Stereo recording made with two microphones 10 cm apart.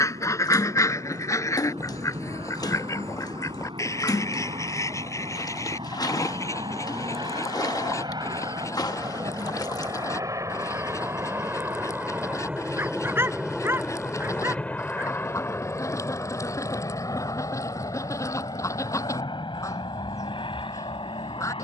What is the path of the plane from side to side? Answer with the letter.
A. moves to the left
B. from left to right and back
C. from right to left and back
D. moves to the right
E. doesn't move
A.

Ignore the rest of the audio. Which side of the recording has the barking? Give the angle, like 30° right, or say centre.
30° right.